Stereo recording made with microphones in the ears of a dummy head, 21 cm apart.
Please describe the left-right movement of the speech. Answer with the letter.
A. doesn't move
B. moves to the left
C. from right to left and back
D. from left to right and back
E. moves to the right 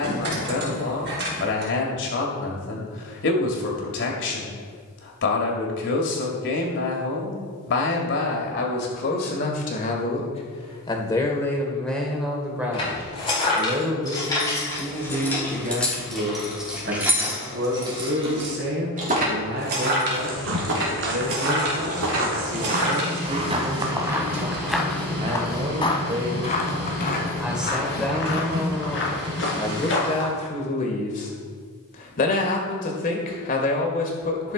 D.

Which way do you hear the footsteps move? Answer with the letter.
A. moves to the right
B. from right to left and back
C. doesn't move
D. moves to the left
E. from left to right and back
D.